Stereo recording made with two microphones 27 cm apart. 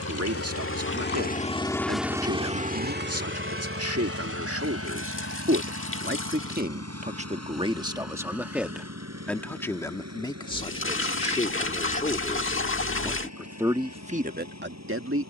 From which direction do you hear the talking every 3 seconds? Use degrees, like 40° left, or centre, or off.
60° right, 60° right, 20° right, 20° left, 10° right.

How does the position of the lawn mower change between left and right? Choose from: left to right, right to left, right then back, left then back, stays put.
left to right.